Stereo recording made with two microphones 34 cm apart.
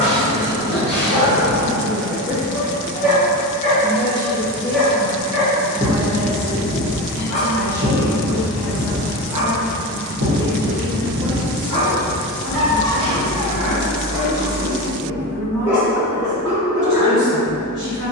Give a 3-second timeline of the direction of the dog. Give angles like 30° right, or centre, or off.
40° left, 10° left, 40° right, 70° right, 60° right, 10° left.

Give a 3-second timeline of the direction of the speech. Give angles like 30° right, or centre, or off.
10° right, 10° right, 30° right, 50° right, 60° right, 60° right.